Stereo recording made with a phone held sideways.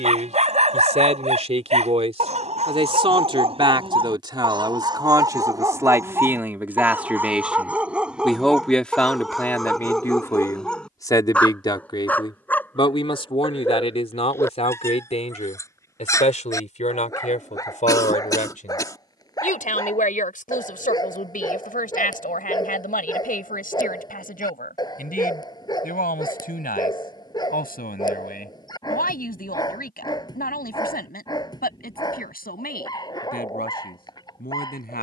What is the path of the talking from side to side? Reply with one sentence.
You can hear the talking move to the left.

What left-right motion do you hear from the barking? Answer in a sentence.
In this clip you hear the barking move to the left.